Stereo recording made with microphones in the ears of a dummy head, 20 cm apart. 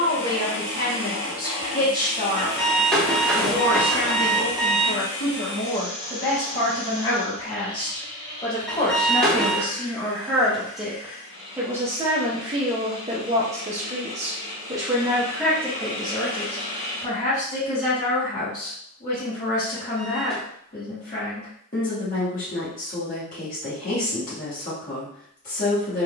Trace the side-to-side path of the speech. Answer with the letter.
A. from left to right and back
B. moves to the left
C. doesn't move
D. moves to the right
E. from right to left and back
A.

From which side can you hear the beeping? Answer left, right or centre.
centre.